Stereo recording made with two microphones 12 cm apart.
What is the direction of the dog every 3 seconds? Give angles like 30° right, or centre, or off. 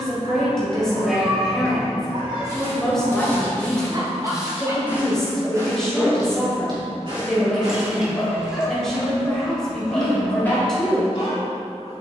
50° right, 30° right, 20° left, 40° left.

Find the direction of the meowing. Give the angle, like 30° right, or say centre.
10° right.